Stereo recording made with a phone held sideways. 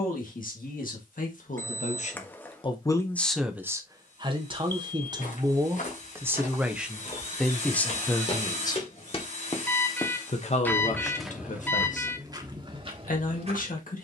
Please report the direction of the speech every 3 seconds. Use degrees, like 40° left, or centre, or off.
60° left, 20° right, 10° left, 50° left, 70° left.